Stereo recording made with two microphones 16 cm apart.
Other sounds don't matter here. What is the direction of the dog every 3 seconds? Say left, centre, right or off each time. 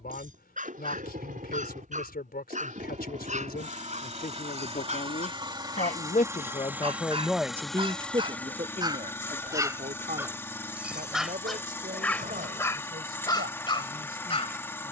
right, right, right, centre, left.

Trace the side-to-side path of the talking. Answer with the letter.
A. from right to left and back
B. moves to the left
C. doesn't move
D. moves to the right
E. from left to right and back
D.